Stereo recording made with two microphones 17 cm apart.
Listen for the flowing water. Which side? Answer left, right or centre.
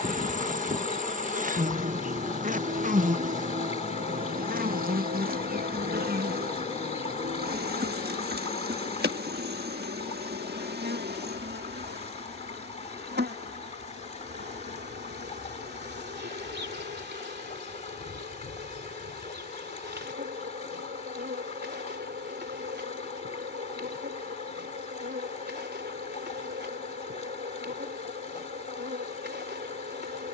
left.